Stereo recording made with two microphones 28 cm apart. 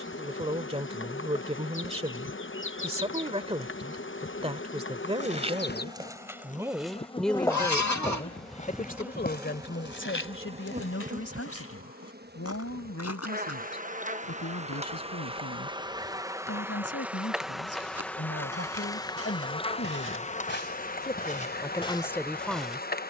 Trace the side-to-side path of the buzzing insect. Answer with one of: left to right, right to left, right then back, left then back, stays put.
right then back.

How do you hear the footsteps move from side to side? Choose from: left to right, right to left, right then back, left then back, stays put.
left then back.